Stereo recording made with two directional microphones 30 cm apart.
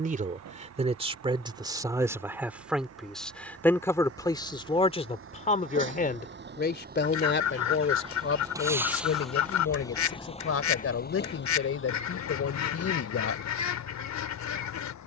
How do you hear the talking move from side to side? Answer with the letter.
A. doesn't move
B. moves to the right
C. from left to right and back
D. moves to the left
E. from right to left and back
D.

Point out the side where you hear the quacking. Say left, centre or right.
left.